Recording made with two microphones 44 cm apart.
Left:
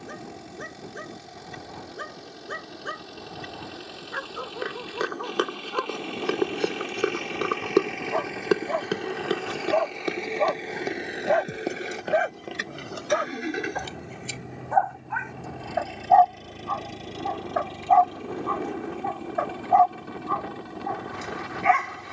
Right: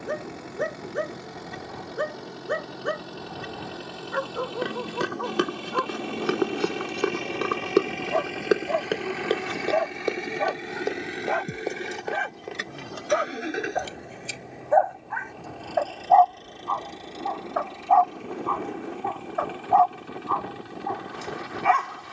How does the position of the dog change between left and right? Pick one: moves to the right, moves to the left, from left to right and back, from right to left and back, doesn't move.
moves to the left.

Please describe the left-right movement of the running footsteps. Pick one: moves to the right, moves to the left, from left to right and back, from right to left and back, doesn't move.
moves to the left.